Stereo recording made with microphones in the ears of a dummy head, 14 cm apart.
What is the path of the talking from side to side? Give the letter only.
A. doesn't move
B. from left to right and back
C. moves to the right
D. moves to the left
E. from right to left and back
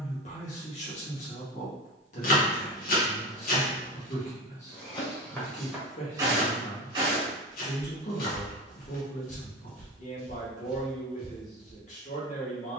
A.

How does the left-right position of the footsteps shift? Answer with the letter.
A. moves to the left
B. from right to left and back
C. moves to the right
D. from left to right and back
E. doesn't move
D.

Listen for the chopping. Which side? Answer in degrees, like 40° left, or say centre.
60° left.